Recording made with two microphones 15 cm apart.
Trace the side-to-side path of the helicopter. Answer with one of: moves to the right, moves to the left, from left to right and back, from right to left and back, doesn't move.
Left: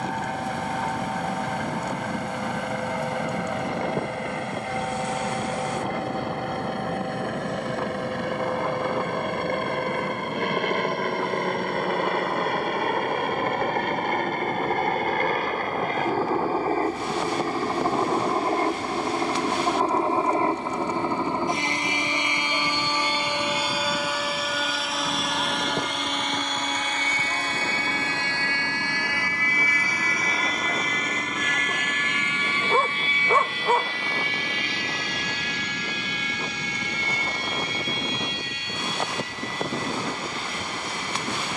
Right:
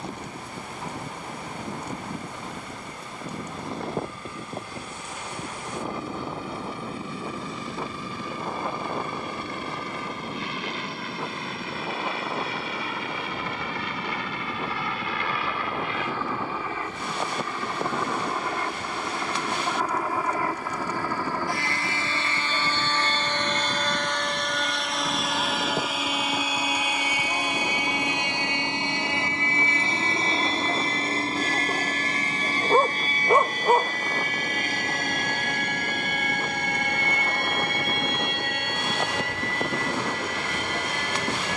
moves to the right.